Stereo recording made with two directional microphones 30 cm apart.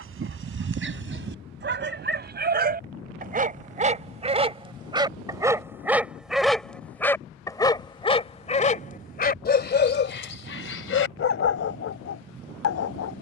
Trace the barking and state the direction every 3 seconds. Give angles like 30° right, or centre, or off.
40° right, 20° right, 10° left, 40° left, 60° left.